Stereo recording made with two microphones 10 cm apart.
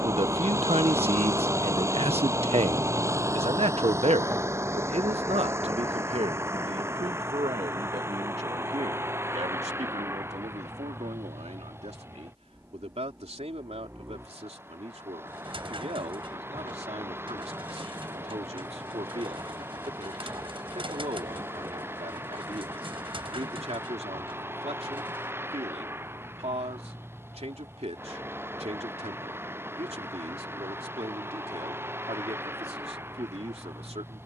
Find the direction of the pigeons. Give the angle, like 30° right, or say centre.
60° right.